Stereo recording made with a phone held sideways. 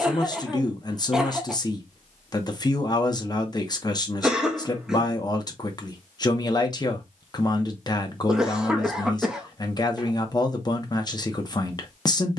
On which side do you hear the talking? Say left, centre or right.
left.